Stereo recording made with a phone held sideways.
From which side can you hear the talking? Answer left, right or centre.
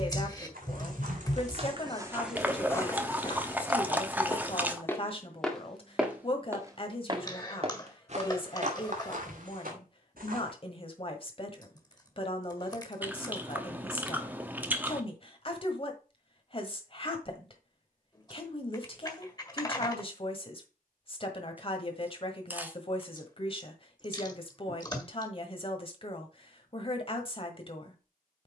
left.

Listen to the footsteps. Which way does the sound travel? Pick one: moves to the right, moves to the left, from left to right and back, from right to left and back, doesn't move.
from right to left and back.